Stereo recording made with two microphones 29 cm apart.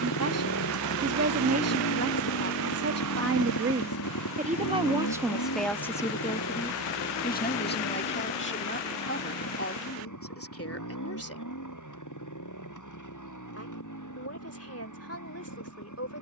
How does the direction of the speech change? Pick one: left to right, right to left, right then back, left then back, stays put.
right to left.